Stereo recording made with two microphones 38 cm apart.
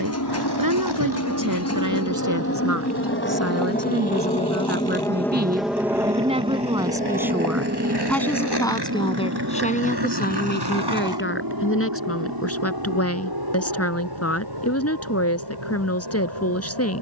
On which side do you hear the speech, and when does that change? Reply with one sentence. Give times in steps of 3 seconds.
In this clip you hear the speech on the right from 0 s, in the centre from 6 s and on the left from 9 s.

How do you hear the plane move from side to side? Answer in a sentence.
You can hear the plane travel towards the right.